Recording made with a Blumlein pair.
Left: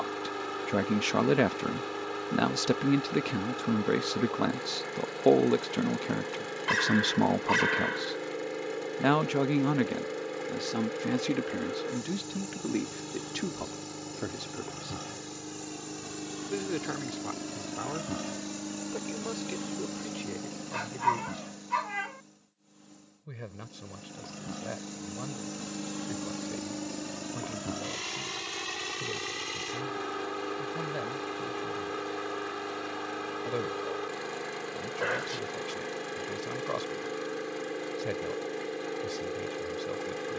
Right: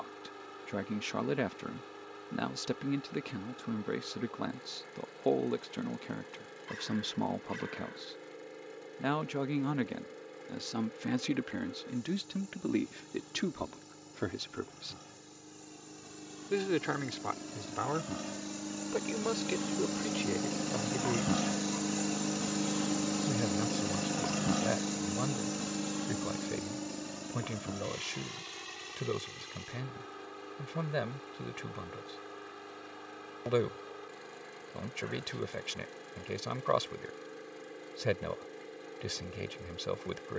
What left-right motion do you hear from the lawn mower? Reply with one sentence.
In this clip you hear the lawn mower go right and come back.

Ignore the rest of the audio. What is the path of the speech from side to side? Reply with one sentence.
In this clip you hear the speech move to the right.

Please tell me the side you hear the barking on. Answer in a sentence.
You can hear the barking on the left.